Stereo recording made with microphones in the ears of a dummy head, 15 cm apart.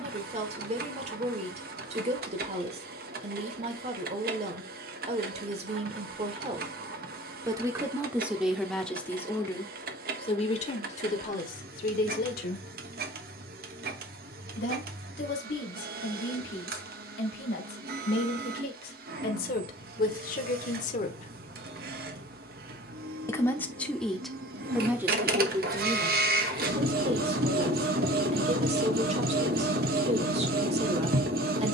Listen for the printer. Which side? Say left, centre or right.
right.